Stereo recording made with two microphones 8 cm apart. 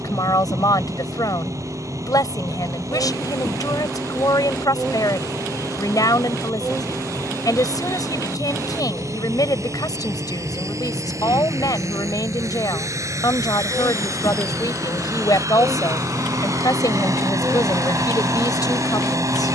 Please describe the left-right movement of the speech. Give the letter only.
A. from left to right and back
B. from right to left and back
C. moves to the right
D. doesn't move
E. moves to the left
D.